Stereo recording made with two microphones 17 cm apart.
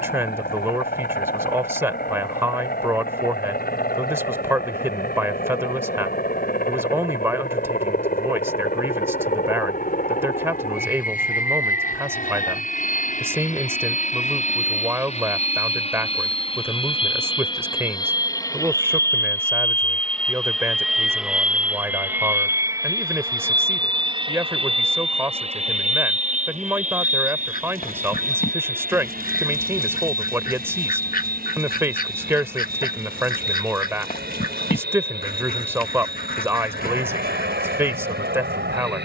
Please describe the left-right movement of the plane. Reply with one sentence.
In this clip you hear the plane move from left to right.